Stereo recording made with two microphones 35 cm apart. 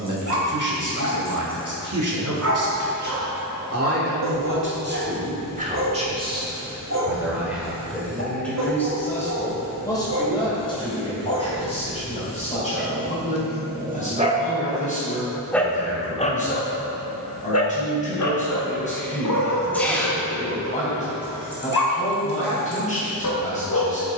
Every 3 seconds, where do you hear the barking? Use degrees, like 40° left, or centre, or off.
50° right, 50° right, 50° right, 50° right, 30° right, 30° left, 60° left, 70° left.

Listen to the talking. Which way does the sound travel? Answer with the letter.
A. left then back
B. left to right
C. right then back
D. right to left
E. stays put
D.